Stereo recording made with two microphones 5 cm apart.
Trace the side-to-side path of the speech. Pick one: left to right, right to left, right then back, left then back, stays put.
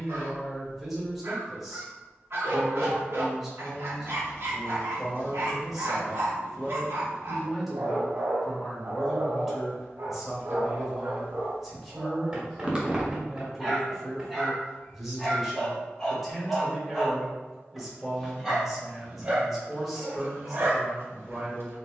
stays put.